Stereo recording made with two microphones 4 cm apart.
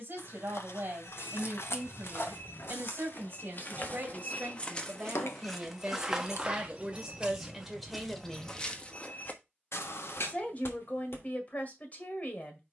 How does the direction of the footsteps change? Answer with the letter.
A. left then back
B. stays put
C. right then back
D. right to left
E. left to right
C.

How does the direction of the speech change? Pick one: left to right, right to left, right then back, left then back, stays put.
right to left.